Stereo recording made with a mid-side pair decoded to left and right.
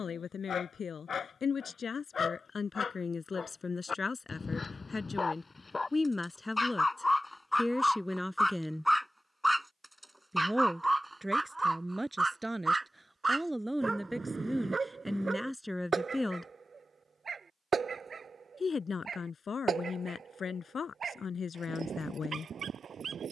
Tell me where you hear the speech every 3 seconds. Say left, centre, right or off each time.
left, left, centre, centre, centre, centre, left, left.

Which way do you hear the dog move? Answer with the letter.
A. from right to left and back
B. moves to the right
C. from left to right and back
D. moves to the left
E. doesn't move
B.